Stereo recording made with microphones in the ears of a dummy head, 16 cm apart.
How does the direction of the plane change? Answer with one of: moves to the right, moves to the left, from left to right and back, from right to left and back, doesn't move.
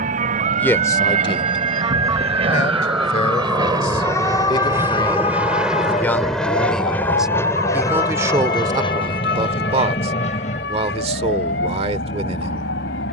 moves to the left.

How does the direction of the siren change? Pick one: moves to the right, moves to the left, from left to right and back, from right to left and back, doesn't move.
moves to the left.